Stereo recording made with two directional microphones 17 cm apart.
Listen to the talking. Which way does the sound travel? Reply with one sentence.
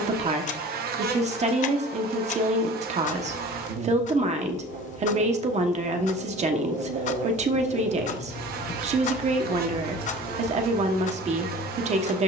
In this clip you hear the talking stay put.